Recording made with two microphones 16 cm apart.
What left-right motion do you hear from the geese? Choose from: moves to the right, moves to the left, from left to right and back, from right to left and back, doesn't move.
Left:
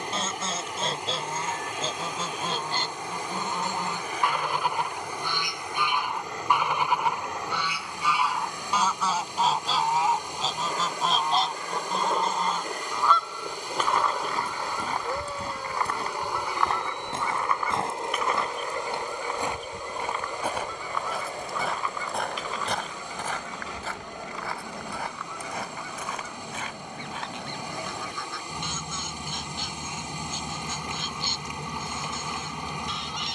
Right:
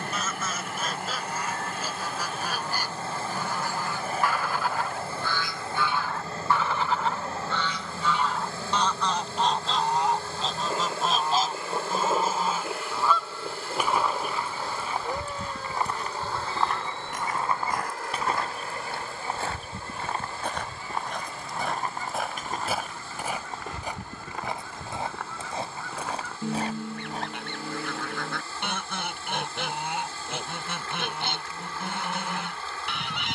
moves to the right.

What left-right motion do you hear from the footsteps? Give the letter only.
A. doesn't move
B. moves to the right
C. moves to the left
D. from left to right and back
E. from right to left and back
B.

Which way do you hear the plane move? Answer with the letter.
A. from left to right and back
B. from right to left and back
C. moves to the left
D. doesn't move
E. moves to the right
C.